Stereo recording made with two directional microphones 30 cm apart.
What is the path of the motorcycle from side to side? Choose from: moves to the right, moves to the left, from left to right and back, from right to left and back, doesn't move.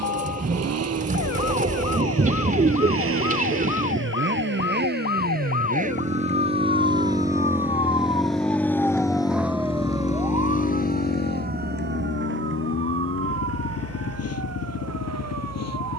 moves to the left.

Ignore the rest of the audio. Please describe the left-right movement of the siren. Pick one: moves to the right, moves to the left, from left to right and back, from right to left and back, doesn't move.
moves to the right.